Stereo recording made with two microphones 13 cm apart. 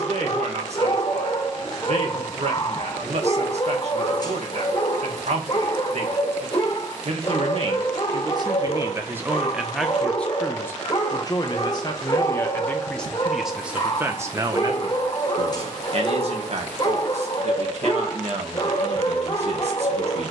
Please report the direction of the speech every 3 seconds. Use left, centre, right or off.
right, right, right, centre, centre, right, right.